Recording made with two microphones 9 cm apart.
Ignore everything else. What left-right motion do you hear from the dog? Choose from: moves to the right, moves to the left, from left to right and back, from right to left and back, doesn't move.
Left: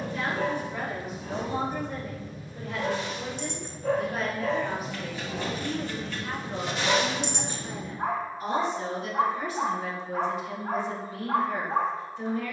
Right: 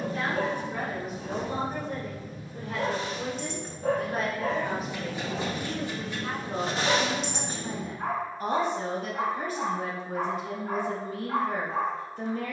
moves to the left.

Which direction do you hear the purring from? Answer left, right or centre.
right.